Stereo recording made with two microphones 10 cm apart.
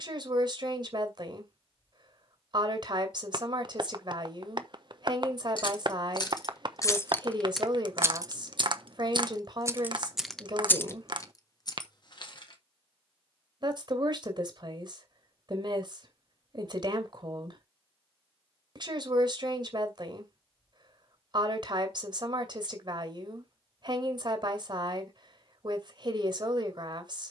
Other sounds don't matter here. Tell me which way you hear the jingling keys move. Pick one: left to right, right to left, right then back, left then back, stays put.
right then back.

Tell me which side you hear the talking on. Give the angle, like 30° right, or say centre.
50° right.